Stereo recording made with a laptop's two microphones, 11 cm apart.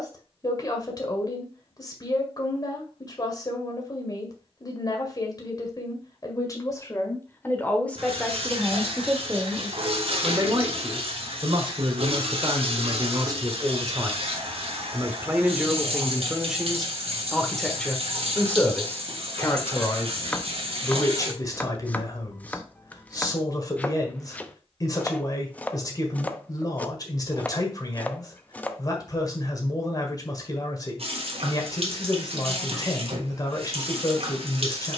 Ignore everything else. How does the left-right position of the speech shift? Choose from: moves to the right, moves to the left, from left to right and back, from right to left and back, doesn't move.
from left to right and back.